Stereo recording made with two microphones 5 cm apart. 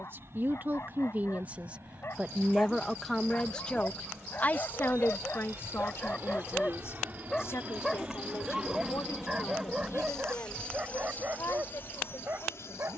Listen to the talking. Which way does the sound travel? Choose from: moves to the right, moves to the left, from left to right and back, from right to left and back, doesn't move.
moves to the left.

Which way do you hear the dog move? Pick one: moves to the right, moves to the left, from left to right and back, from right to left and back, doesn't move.
moves to the right.